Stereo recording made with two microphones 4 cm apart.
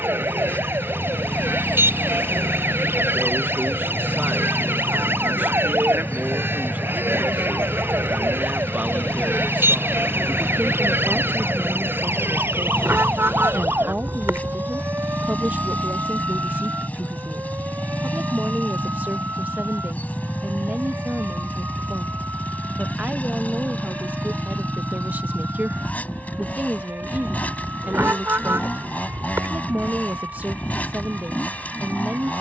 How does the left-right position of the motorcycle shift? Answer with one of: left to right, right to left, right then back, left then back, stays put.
stays put.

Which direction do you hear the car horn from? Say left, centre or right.
right.